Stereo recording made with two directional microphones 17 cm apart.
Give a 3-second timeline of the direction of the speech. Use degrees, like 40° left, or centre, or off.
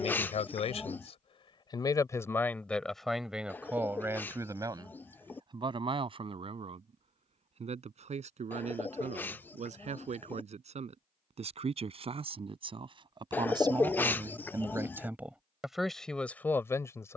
30° left, 20° right, 40° right, 40° right, 20° right, 10° left.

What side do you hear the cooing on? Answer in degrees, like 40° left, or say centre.
10° left.